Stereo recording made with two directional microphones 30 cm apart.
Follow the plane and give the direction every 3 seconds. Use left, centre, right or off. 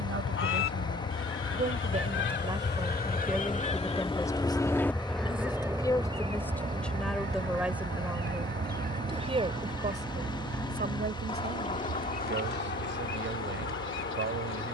left, centre, right, right, right.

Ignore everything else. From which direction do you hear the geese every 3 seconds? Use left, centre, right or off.
left, centre, right, centre, left.